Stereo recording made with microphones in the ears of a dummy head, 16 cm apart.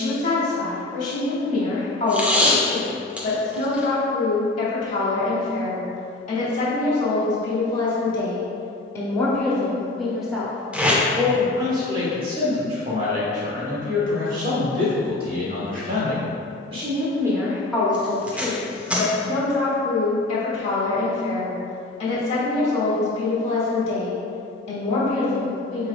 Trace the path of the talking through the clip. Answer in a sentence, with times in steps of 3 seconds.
You can hear the talking on the left from 0 s, in the centre from 9 s, on the right from 12 s and on the left from 18 s.